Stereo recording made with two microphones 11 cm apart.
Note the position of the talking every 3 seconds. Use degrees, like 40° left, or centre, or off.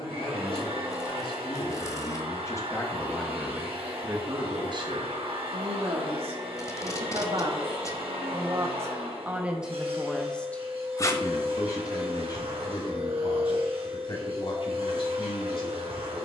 40° left, 30° right, 50° right, 10° left, 50° left, 60° left.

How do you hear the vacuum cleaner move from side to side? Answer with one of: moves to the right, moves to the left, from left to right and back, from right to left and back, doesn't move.
doesn't move.